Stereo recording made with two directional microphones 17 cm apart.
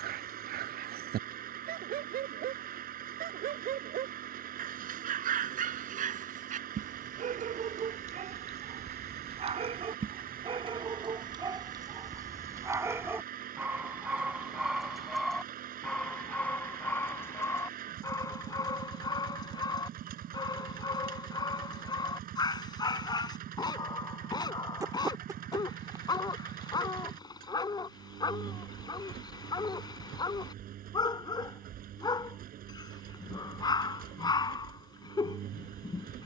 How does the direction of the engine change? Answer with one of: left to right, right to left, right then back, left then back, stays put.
stays put.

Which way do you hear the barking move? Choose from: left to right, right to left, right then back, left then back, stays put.
right to left.